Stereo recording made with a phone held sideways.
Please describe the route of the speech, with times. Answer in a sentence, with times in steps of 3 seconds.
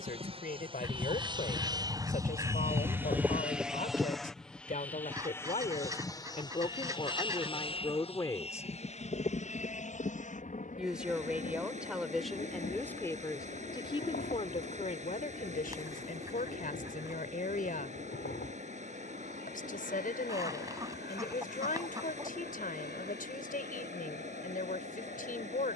In this clip you hear the speech on the left from 0 s, in the centre from 9 s and on the left from 12 s.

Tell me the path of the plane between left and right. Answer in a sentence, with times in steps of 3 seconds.
In this clip you hear the plane on the right from 0 s, in the centre from 3 s and on the left from 6 s.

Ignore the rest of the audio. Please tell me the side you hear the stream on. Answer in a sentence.
In this clip you hear the stream on the right.